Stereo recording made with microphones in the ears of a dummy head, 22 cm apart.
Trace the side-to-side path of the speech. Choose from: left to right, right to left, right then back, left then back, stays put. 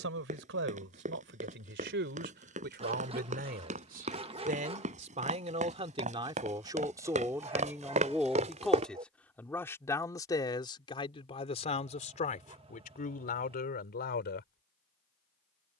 right to left.